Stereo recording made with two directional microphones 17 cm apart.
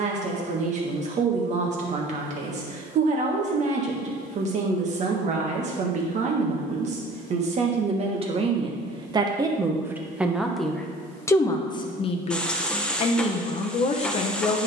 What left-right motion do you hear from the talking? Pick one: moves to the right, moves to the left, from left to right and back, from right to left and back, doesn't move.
moves to the left.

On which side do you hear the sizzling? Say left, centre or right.
centre.